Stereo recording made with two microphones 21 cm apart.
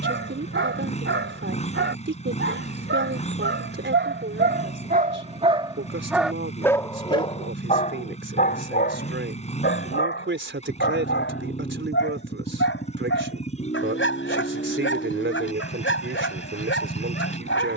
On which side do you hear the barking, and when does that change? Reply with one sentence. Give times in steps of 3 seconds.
In this clip you hear the barking on the right from 0 s and on the left from 6 s.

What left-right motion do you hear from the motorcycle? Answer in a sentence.
In this clip you hear the motorcycle stay put.